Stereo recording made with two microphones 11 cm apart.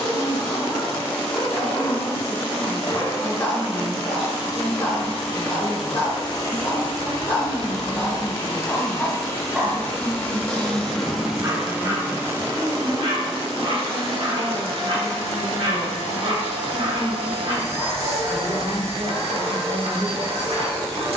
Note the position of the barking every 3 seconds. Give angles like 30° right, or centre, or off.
30° left, 30° left, 20° left, 30° right, 60° right, 60° right, 60° right.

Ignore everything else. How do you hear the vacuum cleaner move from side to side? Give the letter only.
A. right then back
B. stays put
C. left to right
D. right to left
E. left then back
C.